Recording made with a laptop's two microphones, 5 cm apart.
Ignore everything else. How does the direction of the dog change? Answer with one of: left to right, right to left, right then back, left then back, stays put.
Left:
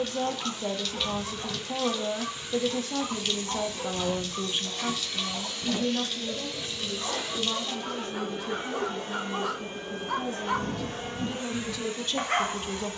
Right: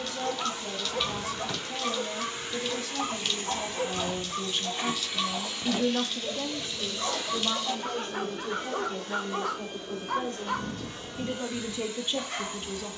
right to left.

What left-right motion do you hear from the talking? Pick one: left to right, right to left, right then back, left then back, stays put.
right then back.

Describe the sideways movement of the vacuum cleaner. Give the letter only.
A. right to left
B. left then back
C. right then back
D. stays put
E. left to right
A.